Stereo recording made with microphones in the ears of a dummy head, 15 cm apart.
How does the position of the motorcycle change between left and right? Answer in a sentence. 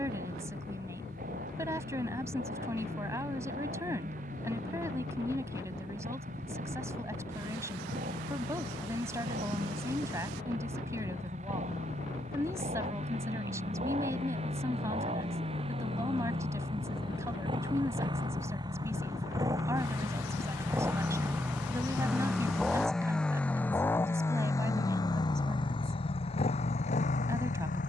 In this clip you hear the motorcycle travel towards the left.